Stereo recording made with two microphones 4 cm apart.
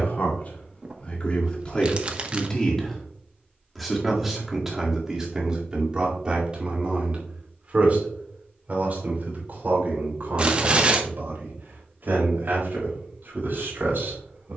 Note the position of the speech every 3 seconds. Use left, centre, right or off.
left, centre, right, right, right.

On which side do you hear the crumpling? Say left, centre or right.
right.